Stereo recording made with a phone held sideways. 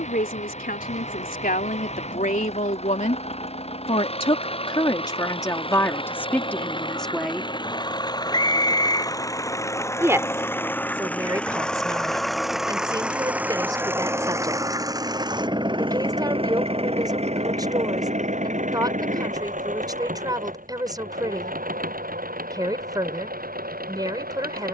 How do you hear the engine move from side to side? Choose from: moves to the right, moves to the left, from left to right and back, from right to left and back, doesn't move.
moves to the right.